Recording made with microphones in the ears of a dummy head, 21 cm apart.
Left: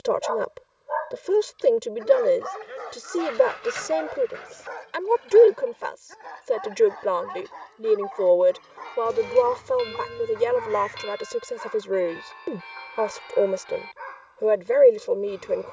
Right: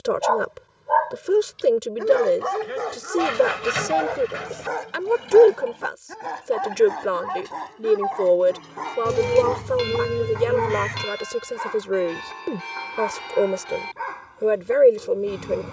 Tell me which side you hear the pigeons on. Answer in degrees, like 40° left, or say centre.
80° right.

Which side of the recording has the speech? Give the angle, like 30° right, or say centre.
10° right.